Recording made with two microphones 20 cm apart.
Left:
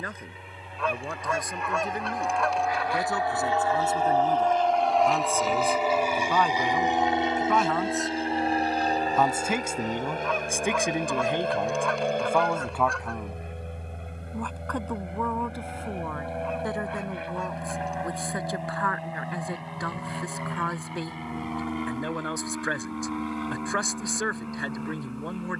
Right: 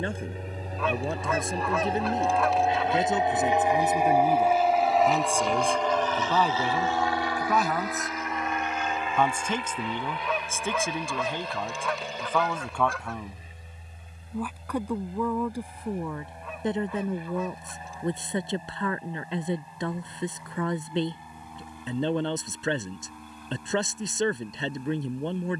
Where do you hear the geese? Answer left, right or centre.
centre.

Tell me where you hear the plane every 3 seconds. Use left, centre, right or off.
right, centre, left, left, left, left, left, left, left.